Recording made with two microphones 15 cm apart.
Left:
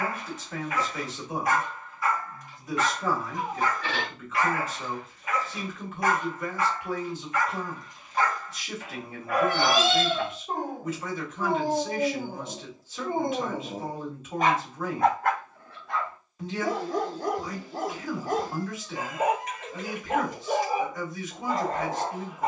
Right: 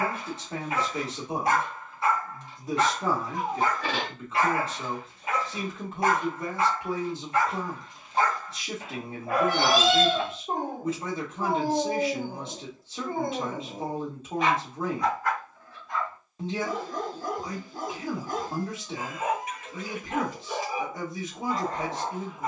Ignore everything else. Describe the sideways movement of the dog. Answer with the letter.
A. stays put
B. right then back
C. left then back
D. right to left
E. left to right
D.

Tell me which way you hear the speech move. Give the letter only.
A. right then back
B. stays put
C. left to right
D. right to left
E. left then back
B.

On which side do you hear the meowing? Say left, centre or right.
right.